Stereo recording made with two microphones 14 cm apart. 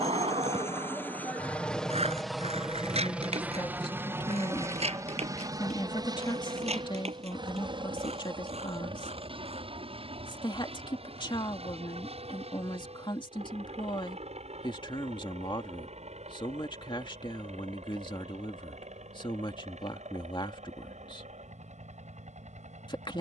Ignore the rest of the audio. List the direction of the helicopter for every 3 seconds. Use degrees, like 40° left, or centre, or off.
10° left, 20° right, 30° right, 40° right, 50° right, 50° right, 50° right, 50° right.